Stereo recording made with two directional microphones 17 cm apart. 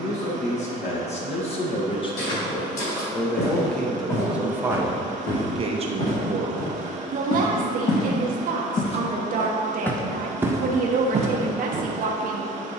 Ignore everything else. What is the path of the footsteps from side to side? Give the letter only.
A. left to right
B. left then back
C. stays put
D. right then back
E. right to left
A.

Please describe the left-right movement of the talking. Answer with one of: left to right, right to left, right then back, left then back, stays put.
left to right.